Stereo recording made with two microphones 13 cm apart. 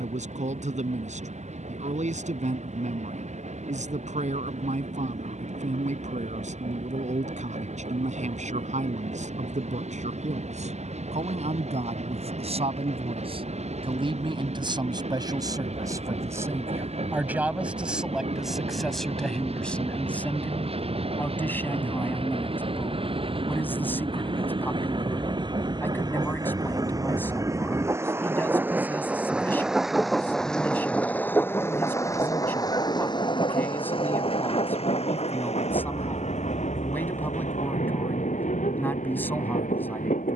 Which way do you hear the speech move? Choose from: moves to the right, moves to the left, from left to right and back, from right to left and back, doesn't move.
moves to the left.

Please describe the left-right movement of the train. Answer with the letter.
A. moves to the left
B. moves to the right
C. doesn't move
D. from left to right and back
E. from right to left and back
A.